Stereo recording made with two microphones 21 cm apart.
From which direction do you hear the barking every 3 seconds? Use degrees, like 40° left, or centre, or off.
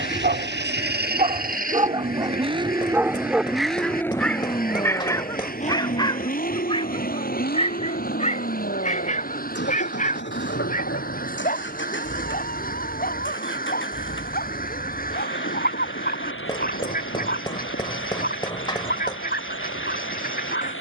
30° right, 10° left, 30° left, 40° left, 40° left, 50° left, 50° left.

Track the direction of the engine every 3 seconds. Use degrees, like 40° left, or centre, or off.
40° right, 20° left, 50° left, 60° left, 70° left, 70° left, 70° left.